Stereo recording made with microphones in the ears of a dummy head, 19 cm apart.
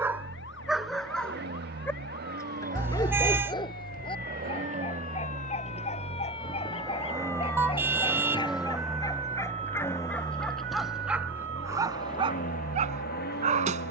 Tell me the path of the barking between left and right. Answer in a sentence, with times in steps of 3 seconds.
In this clip you hear the barking in the centre from 0 s, on the left from 3 s, in the centre from 9 s and on the right from 12 s.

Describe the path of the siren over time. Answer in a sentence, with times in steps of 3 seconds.
In this clip you hear the siren on the left from 0 s, in the centre from 6 s and on the right from 9 s.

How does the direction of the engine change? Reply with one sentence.
In this clip you hear the engine move to the left.